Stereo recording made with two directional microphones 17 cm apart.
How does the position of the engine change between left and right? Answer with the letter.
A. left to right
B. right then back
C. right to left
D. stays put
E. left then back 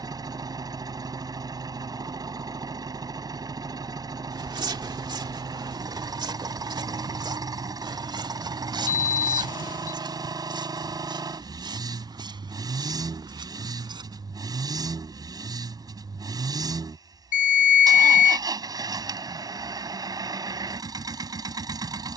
D.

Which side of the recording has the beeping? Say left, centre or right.
left.